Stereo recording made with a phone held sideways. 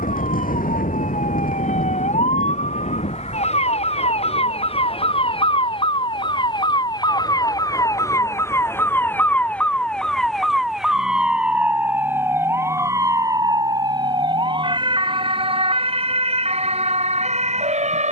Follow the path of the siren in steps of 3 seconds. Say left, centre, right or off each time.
left, left, left, centre, right, right.